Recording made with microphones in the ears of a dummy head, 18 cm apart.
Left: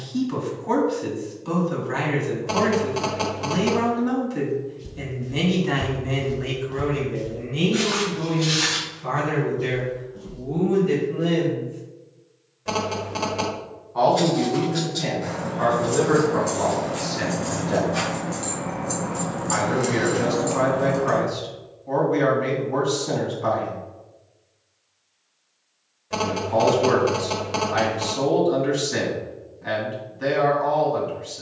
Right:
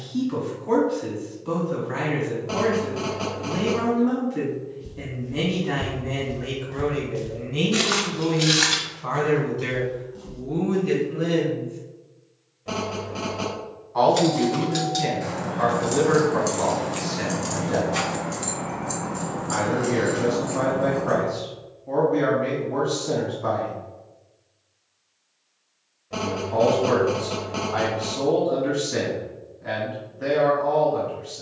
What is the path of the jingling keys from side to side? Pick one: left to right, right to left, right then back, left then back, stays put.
right to left.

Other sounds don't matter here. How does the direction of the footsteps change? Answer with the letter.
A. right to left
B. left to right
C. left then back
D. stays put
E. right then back
B.